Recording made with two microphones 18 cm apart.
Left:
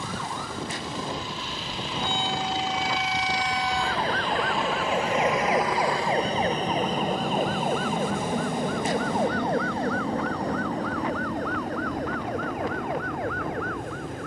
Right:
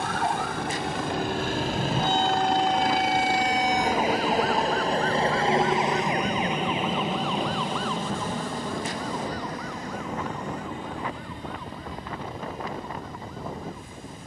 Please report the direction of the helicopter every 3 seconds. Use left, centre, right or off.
right, right, centre, left, left.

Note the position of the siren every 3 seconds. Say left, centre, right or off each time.
right, centre, left, left, left.